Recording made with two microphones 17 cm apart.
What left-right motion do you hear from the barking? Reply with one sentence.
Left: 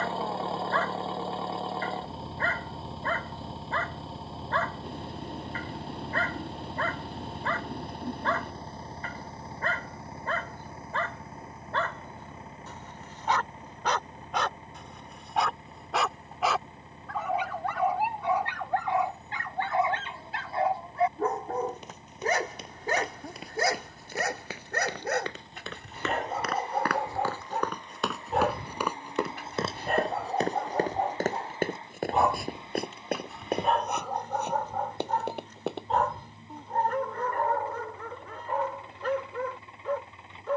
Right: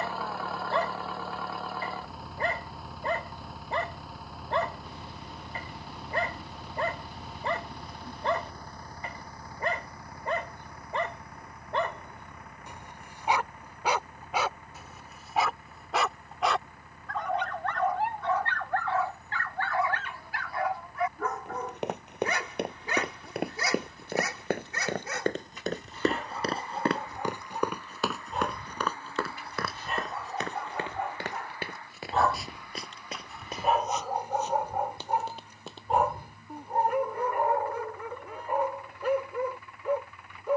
You can hear the barking move from right to left and back again.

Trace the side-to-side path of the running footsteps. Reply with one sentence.
In this clip you hear the running footsteps go from the right side to the left.